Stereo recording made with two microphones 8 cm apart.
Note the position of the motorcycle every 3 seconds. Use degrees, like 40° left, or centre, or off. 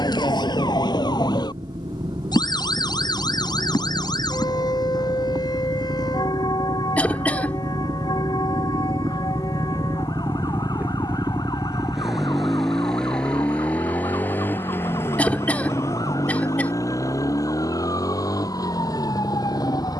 80° right, 70° right, 60° right, 30° right, 10° left, 40° left, 50° left.